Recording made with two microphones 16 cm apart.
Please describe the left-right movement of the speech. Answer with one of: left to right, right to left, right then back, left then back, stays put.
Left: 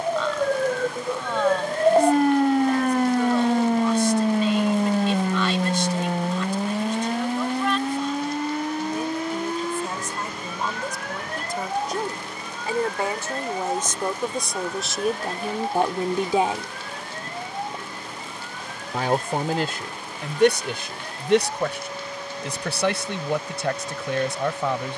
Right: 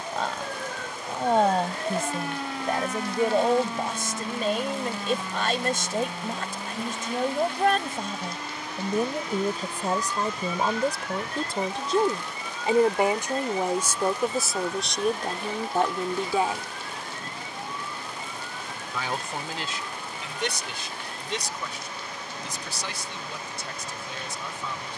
right to left.